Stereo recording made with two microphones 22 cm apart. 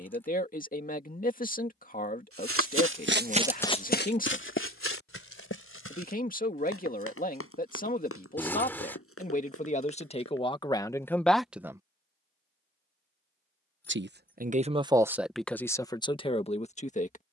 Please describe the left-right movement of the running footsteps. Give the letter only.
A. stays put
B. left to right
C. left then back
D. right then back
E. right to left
E.